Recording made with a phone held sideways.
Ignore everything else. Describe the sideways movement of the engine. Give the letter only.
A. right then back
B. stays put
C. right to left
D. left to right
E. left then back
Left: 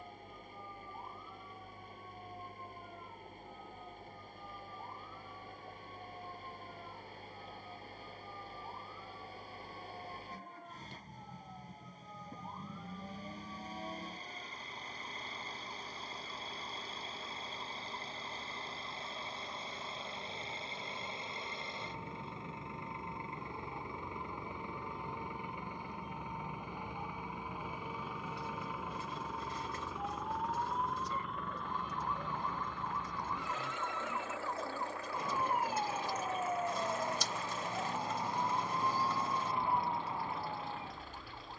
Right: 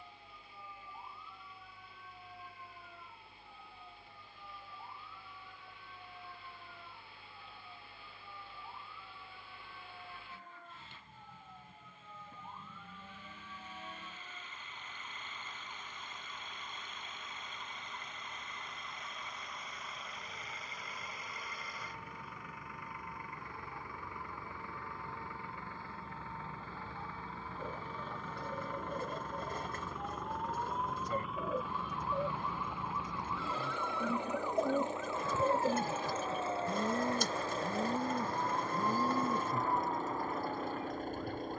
D.